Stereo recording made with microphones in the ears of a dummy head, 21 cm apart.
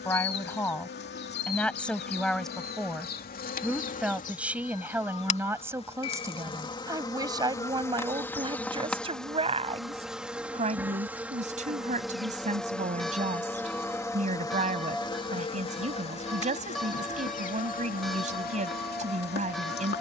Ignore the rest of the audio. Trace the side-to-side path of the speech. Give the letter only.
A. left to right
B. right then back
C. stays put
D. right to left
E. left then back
A.